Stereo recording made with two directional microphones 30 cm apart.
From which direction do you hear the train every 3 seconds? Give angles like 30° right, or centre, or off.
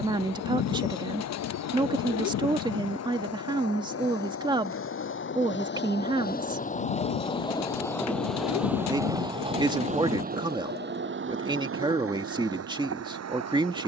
60° left, 50° left, 10° left, 30° right, 50° right.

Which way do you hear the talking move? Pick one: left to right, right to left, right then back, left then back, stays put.
stays put.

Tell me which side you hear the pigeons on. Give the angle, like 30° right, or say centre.
60° left.